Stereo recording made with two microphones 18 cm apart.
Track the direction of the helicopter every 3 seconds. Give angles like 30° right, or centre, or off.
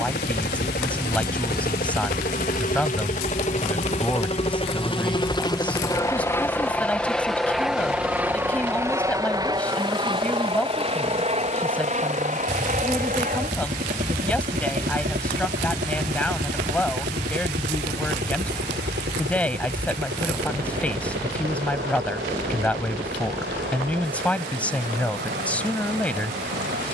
50° left, 30° left, centre, 30° right, 40° right, 50° right, 60° right, 60° right, 70° right.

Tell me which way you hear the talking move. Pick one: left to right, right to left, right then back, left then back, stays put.
stays put.